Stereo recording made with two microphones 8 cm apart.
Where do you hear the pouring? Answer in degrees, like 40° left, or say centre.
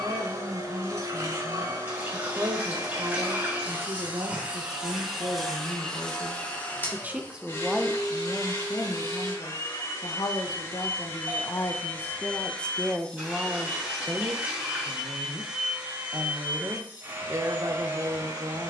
20° right.